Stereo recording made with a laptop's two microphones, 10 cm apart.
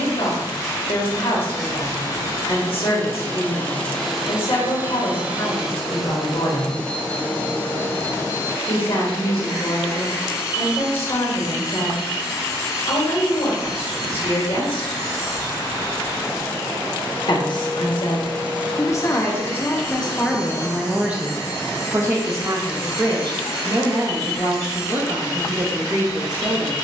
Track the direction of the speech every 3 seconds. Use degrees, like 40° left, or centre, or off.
70° left, 70° left, 70° left, 70° left, 70° left, 50° left, 20° left, 30° right, 50° right.